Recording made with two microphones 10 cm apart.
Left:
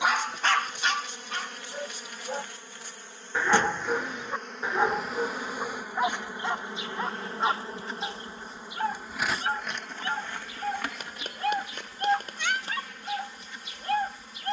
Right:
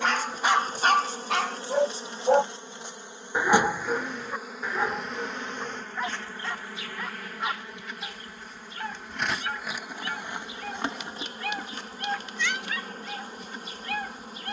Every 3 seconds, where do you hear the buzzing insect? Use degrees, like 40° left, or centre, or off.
30° right, centre, 20° left, 20° right, 40° right.